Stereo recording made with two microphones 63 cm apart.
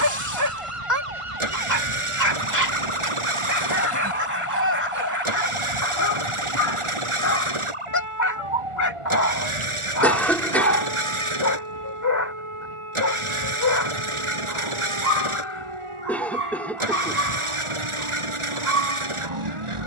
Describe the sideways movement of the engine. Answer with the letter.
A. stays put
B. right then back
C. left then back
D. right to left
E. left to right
A.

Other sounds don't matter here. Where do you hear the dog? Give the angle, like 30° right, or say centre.
30° left.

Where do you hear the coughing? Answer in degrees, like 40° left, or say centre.
centre.